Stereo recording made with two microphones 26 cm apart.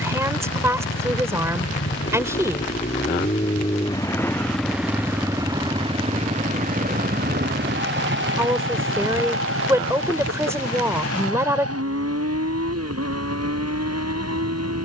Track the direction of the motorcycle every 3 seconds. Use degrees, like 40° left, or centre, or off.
50° left, centre, 40° right, 60° right, 70° right.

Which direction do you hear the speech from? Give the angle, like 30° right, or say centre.
10° right.